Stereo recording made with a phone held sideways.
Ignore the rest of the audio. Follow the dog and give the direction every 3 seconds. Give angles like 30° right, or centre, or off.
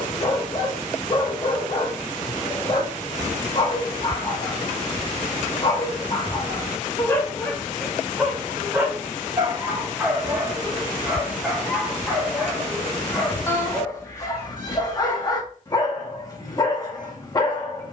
30° left, 30° left, 10° left, 10° right, 20° left, 30° left.